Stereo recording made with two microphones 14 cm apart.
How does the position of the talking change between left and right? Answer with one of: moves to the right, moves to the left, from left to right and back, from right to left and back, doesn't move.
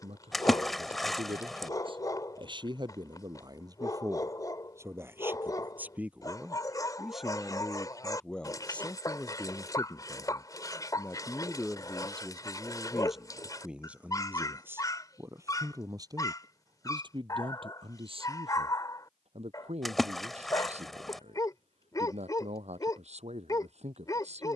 from right to left and back.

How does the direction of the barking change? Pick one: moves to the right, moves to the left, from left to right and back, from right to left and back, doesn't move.
doesn't move.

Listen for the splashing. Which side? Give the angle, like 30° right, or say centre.
centre.